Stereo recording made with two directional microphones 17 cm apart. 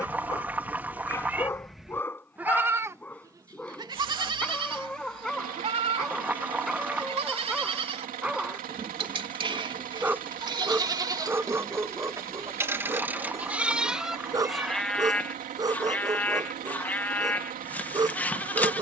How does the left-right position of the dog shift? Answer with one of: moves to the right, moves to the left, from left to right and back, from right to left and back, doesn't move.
moves to the right.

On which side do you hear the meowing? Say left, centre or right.
centre.